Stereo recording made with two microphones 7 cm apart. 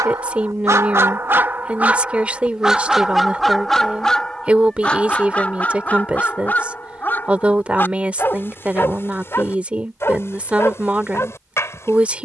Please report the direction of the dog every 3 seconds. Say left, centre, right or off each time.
right, centre, left, left.